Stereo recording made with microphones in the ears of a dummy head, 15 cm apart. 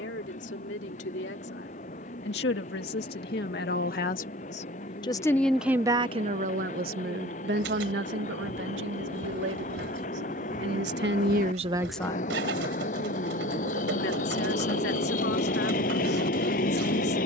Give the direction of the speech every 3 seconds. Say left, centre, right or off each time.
left, left, right, right, left, left.